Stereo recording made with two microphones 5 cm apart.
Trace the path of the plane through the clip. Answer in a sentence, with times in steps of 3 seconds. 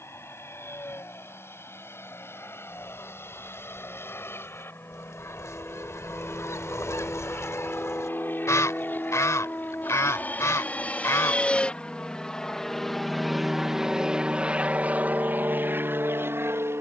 In this clip you hear the plane on the left from 0 s, in the centre from 12 s and on the right from 15 s.